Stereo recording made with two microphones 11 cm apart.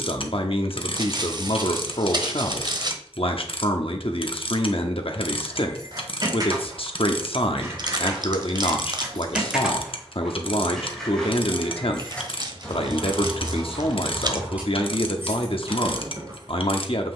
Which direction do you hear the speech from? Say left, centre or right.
left.